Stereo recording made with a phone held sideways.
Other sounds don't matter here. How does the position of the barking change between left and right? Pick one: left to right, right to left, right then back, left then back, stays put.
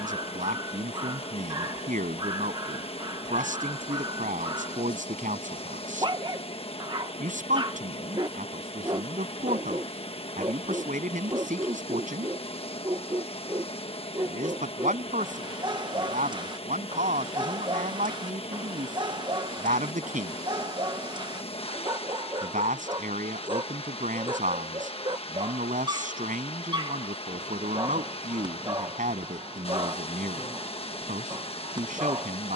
stays put.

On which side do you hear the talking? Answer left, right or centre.
right.